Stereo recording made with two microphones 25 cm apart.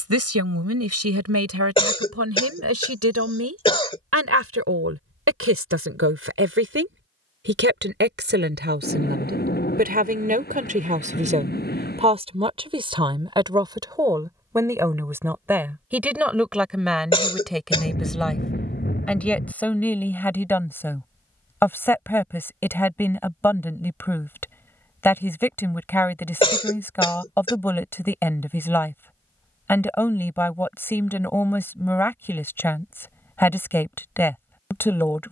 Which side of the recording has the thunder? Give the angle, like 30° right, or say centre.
40° left.